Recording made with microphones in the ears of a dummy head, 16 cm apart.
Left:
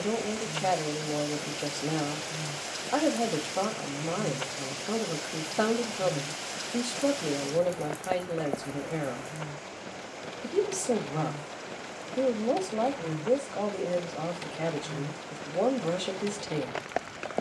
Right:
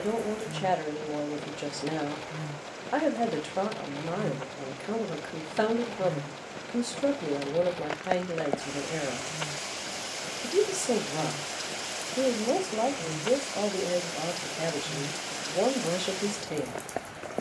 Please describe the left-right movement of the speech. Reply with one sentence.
You can hear the speech stay put.